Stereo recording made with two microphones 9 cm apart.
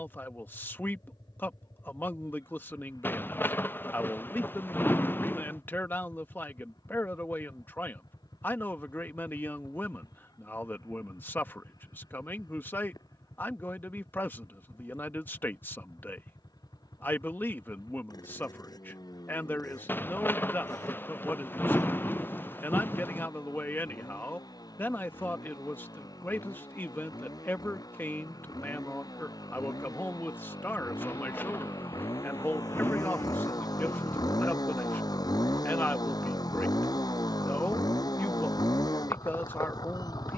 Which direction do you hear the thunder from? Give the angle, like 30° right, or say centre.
20° left.